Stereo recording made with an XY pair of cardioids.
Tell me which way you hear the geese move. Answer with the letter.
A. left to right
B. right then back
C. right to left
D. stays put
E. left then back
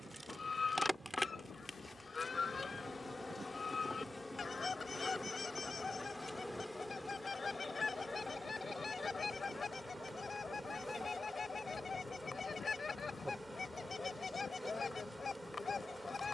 D.